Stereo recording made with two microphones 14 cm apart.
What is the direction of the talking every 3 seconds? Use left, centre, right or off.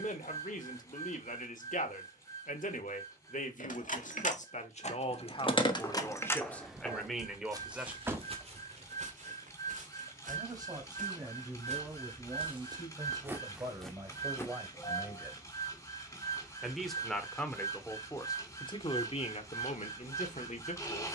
left, left, centre, right, right, centre, left.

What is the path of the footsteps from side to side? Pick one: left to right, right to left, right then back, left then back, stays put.
right then back.